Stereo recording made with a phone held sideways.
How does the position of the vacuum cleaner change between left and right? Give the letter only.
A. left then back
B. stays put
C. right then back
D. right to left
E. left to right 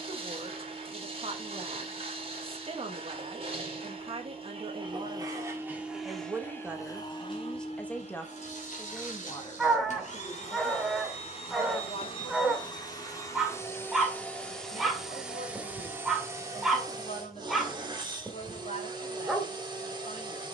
A.